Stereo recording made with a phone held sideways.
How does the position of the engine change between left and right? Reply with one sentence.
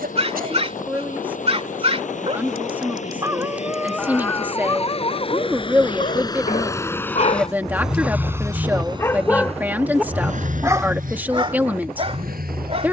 You can hear the engine move from left to right.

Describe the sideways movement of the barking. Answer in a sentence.
In this clip you hear the barking go left and come back.